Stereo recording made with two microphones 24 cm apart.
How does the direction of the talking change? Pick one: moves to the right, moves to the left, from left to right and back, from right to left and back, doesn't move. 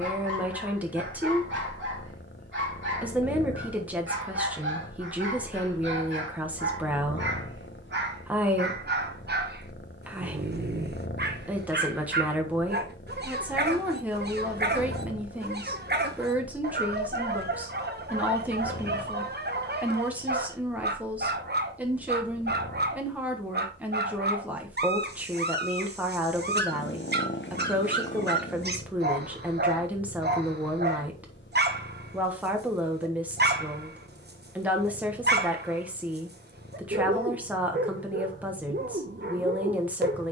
doesn't move.